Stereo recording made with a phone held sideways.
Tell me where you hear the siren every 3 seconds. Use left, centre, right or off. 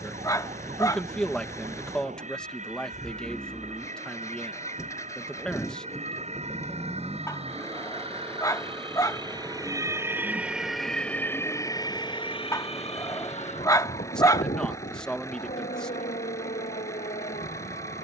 right, right, right, centre, left, left.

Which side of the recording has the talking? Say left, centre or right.
centre.